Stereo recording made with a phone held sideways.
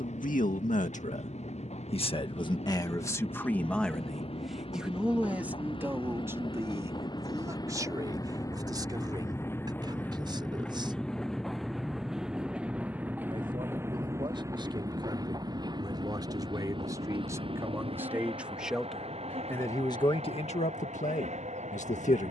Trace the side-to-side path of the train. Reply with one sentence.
In this clip you hear the train move from left to right.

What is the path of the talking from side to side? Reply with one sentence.
You can hear the talking move from left to right and back again.